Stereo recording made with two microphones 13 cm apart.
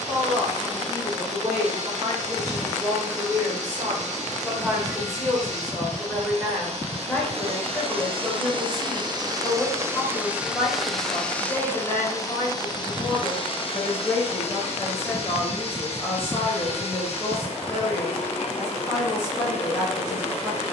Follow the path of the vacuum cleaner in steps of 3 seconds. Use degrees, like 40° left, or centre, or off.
60° right, 60° right, 50° right, 10° right, 40° left, 50° left, 50° left.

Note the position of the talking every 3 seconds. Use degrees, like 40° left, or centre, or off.
20° right, 10° right, 10° left, 20° left, 20° left, 20° left, 20° left.